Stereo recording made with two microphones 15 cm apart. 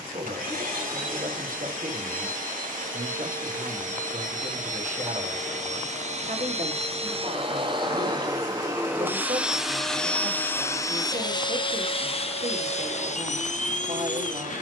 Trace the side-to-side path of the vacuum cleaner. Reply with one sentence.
In this clip you hear the vacuum cleaner go from the right side to the left.